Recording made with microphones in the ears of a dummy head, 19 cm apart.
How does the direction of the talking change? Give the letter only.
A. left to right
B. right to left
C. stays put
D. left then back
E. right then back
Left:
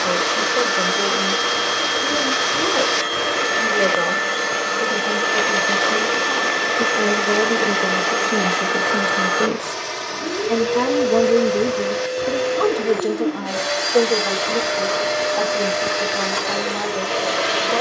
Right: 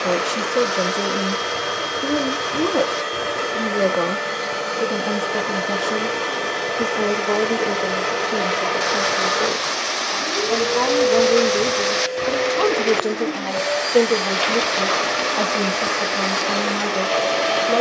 D.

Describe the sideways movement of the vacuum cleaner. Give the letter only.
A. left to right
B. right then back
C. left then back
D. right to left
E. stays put
E.